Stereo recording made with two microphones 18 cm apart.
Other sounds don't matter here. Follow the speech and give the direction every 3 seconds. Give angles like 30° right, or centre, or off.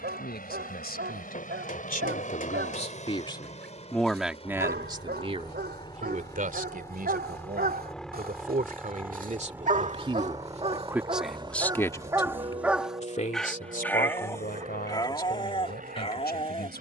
60° left, 10° right, 50° right, 20° right, 50° left, 70° left.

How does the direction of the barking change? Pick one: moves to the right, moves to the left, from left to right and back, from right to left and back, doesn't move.
moves to the left.